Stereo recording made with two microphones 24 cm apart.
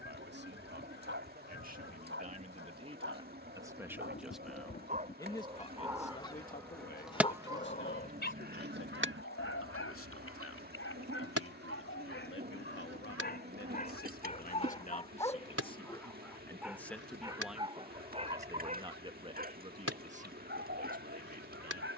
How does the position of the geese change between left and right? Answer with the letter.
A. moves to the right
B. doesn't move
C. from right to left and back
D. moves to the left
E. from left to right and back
A.